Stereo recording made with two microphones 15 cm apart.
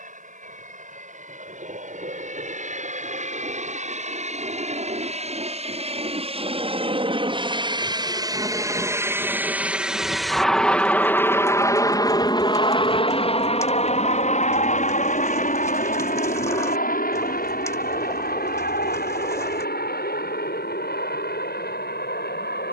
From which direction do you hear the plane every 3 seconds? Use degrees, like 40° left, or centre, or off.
60° right, 50° right, 30° right, centre, 40° left, 60° left, 70° left, 70° left.